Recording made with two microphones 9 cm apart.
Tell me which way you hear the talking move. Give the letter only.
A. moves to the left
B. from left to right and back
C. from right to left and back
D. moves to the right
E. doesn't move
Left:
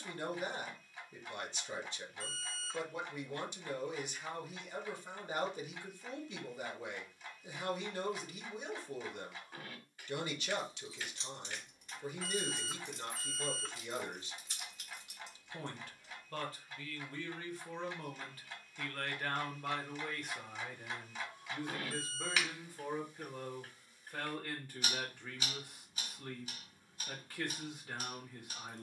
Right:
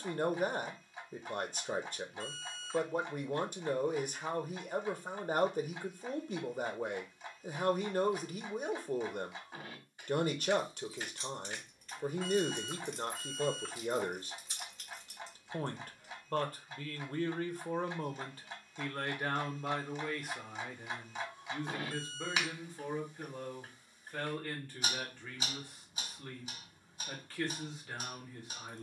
A.